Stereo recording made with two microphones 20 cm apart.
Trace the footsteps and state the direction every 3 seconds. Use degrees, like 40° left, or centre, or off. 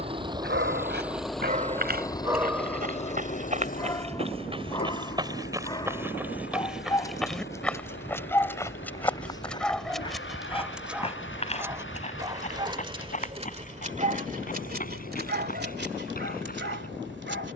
50° right, 30° right, centre, 30° left, 40° left, 50° left.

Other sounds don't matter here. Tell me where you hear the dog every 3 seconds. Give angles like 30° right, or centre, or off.
40° right, 20° left, 10° left, centre, 30° right, 60° right.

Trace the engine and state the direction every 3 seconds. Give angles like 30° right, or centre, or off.
centre, 50° left, 70° left, 70° left, 80° left, 80° left.